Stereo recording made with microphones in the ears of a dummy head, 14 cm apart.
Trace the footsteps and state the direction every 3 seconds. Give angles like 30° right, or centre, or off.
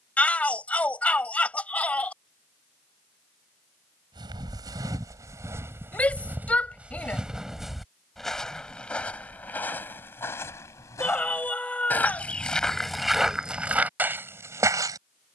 off, 20° right, centre, 10° left, centre.